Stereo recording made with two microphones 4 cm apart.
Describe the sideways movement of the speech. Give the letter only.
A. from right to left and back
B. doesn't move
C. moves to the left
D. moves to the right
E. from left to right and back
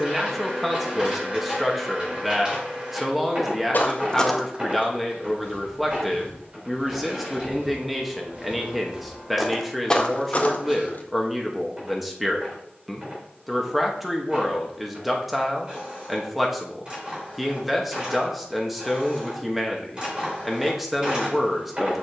B.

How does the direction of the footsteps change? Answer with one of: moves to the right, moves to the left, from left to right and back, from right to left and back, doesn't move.
from left to right and back.